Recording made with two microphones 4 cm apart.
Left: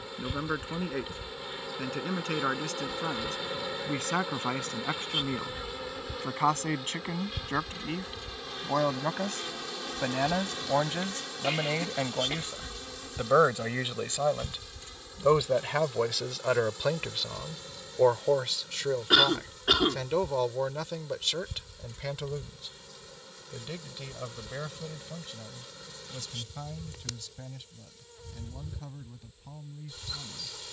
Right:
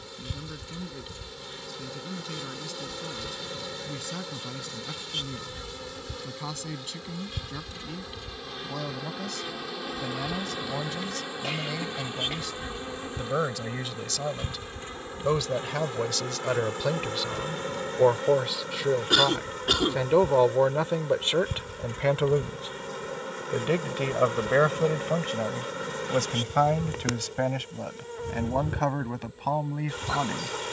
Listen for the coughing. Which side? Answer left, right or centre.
centre.